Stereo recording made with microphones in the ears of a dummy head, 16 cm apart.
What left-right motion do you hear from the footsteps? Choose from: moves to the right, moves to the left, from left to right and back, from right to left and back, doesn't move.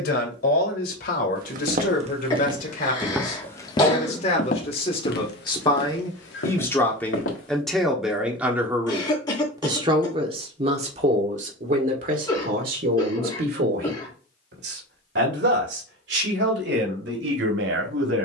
moves to the left.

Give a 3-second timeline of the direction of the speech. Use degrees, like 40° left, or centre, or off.
50° left, 30° left, centre, 30° right, 50° right, 70° right.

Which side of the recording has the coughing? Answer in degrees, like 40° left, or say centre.
20° left.